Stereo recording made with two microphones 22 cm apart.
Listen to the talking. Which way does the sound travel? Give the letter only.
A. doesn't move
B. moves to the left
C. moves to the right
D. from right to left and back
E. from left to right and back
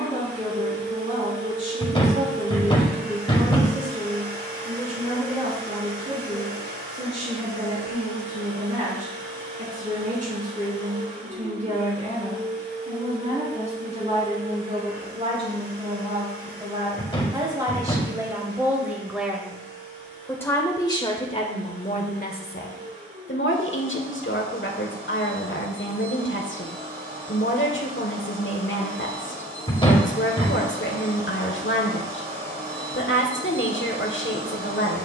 B.